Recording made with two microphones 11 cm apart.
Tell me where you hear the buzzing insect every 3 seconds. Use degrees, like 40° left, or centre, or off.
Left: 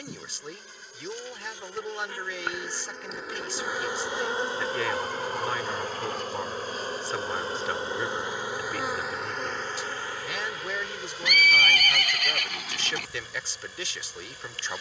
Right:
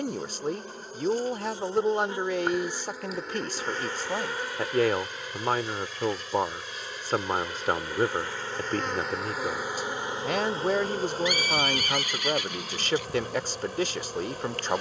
30° right, 20° left, 30° left, 20° right, 50° right.